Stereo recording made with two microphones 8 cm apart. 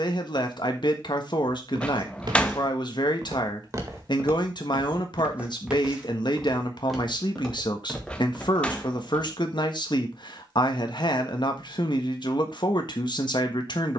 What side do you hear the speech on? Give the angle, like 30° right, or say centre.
70° left.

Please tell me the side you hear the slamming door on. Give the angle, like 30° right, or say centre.
20° left.